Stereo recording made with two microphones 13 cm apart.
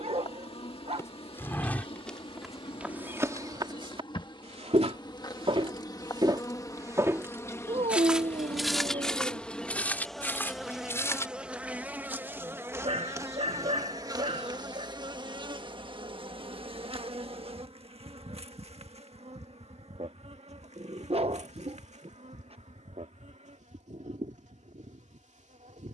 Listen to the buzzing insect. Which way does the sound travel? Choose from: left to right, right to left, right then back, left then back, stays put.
left to right.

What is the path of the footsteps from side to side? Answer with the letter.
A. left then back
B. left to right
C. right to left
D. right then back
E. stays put
D.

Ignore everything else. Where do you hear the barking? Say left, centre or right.
right.